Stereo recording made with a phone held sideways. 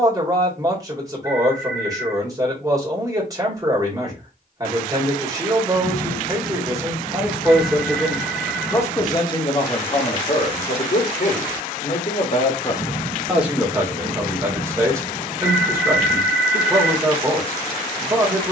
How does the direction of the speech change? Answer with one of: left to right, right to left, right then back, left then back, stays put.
left then back.